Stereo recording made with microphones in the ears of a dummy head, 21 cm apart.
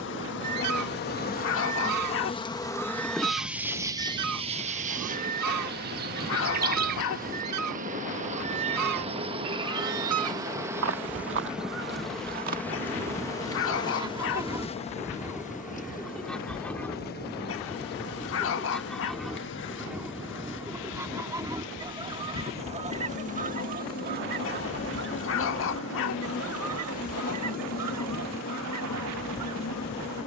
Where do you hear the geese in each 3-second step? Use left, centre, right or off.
right, right, right, right, right, centre, centre, right, right, right.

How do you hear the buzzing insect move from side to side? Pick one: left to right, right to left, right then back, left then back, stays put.
right then back.